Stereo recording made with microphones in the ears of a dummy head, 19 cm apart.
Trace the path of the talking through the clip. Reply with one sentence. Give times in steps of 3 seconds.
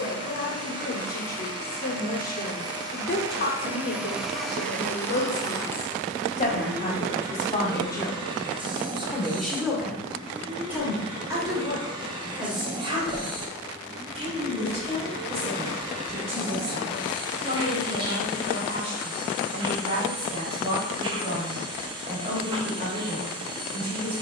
In this clip you hear the talking on the left from 0 s, in the centre from 9 s and on the right from 12 s.